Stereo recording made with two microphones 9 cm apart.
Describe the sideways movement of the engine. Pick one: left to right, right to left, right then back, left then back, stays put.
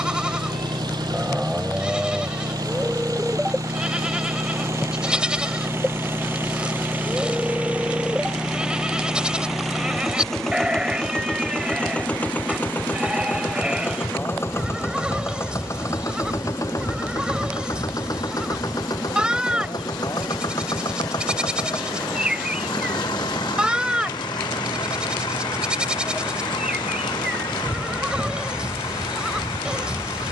right to left.